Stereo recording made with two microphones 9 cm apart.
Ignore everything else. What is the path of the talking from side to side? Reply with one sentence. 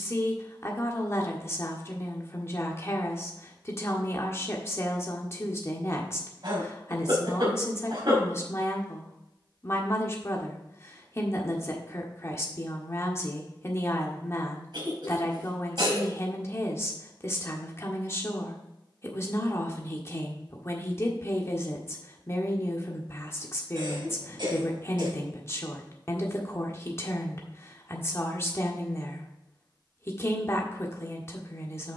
You can hear the talking stay in one place.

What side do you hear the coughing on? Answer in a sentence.
In this clip you hear the coughing on the right.